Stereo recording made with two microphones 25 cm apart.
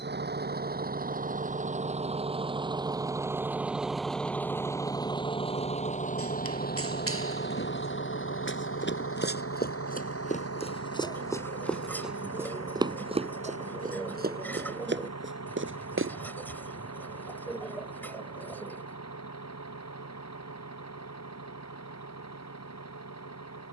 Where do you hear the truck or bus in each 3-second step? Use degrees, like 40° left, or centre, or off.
30° right, 10° left, 40° left, 60° left, 70° left, 80° left, 80° left, 80° left.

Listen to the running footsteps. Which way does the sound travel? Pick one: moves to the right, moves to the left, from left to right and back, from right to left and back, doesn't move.
moves to the right.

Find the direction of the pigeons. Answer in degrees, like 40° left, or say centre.
10° left.